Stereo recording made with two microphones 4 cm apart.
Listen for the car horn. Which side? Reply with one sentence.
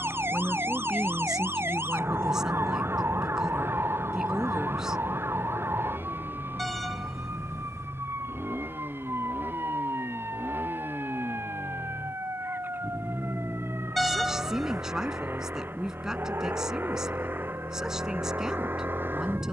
You can hear the car horn in the centre.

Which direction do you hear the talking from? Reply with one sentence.
You can hear the talking in the centre.